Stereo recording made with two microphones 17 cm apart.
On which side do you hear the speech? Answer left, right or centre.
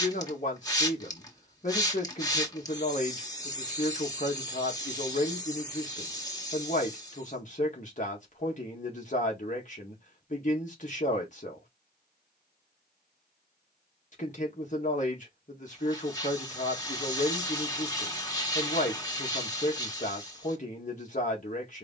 left.